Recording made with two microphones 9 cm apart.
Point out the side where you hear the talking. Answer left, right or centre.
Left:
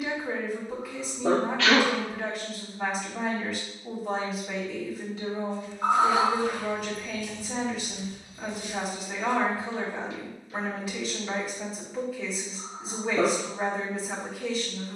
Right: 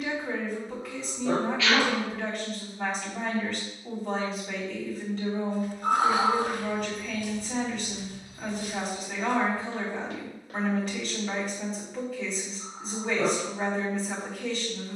centre.